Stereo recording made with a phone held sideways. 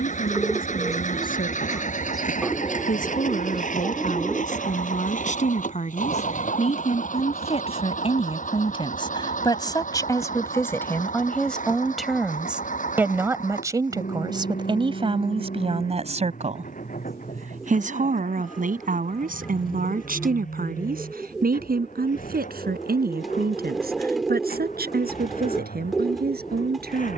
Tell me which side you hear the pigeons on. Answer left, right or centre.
centre.